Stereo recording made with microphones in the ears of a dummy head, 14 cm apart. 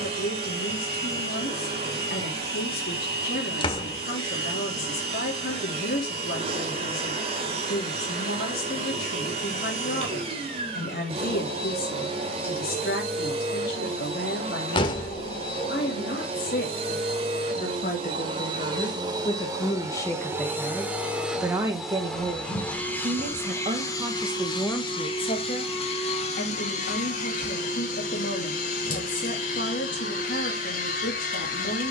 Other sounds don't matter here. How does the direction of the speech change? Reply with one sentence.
In this clip you hear the speech go right and come back.